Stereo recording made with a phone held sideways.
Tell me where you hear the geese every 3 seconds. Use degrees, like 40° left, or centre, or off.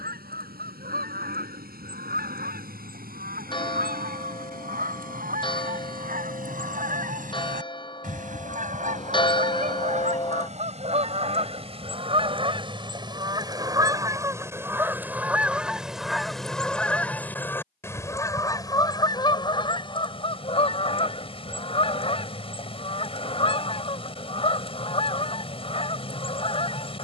70° right, 60° right, 60° right, 50° right, 30° right, centre, 30° left, 40° left, 40° left.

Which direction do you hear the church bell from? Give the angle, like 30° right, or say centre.
30° left.